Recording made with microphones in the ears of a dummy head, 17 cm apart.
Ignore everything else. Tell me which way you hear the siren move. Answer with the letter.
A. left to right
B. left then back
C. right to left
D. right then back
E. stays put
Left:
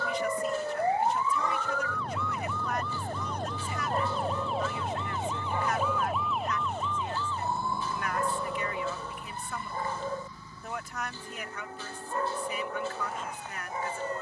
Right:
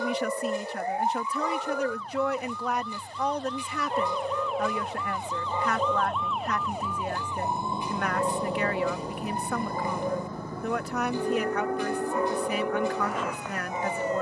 A.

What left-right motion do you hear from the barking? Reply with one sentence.
You can hear the barking stay put.